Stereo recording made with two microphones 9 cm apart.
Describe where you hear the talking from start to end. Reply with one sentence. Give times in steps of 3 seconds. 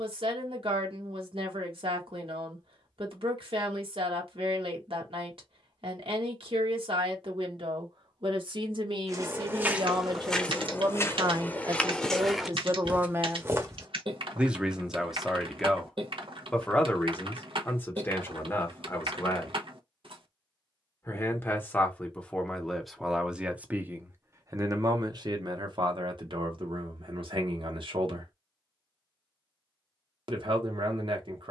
You can hear the talking on the right from 0 s, in the centre from 15 s, on the left from 18 s, in the centre from 21 s and on the right from 24 s.